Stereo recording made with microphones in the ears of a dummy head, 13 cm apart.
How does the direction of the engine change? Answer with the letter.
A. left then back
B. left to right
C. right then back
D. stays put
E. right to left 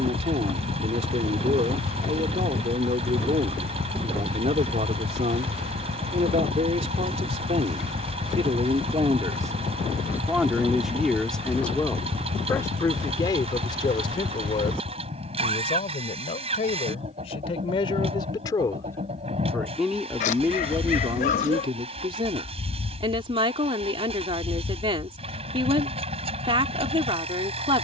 D.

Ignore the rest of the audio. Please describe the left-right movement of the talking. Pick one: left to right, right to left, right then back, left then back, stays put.
left then back.